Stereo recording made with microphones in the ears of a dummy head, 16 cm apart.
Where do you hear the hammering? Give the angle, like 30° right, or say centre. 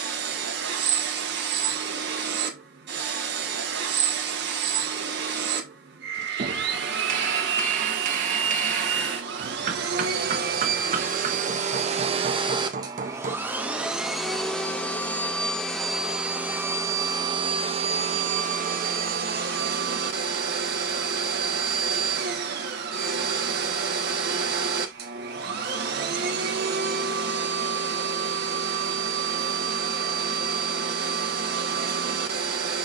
40° right.